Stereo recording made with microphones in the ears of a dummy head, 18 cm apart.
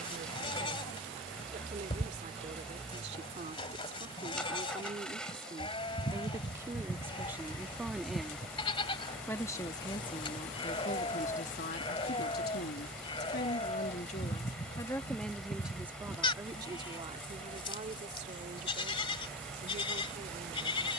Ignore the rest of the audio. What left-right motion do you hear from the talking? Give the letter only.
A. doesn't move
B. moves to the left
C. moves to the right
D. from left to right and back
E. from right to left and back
E.